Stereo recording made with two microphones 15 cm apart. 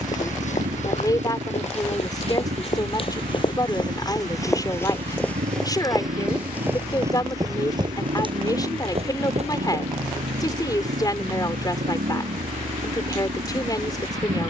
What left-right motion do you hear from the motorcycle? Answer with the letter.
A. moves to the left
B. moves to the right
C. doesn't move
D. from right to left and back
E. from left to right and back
C.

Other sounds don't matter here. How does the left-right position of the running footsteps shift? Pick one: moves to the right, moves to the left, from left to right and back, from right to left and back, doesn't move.
moves to the right.